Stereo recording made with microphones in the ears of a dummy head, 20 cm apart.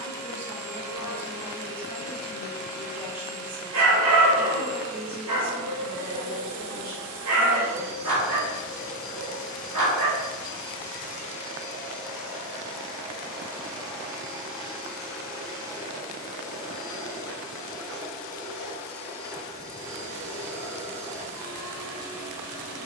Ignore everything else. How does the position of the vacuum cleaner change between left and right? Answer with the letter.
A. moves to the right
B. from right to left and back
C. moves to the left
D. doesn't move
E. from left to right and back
B.